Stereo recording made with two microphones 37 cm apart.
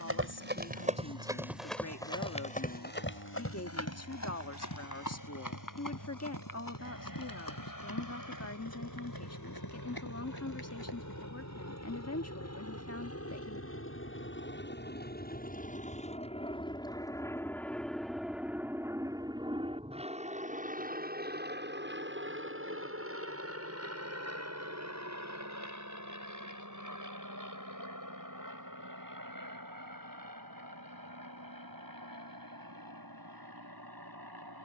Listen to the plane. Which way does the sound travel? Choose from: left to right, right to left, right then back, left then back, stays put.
left to right.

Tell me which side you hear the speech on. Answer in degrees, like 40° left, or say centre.
40° left.